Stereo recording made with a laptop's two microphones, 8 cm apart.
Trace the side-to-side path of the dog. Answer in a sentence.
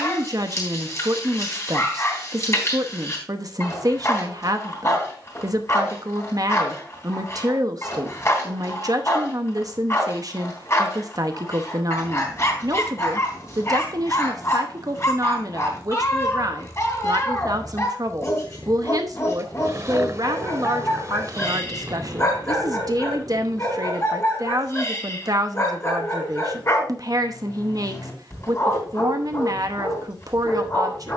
You can hear the dog stay put.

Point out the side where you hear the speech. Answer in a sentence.
In this clip you hear the speech on the right.